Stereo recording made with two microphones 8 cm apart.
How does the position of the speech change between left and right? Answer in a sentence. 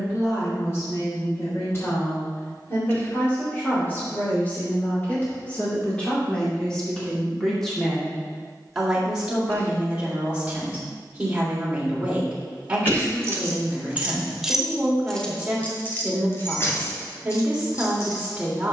You can hear the speech go from the left side to the right.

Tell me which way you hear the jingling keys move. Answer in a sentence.
You can hear the jingling keys move to the left.